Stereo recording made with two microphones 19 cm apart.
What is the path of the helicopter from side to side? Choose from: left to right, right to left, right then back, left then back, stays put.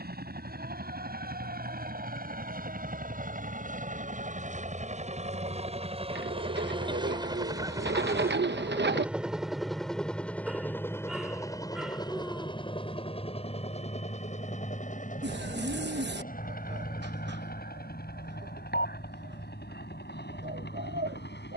right to left.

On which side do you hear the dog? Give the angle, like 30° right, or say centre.
centre.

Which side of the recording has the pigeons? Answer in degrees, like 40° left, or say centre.
70° right.